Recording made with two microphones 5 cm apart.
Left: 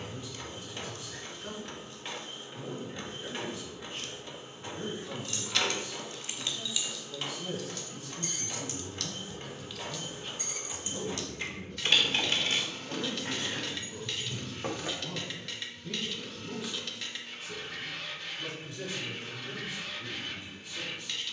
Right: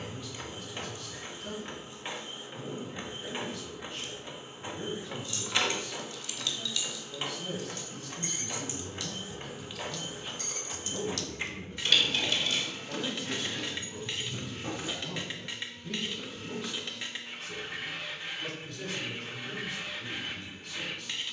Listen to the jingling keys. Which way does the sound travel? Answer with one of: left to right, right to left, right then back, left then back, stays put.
right then back.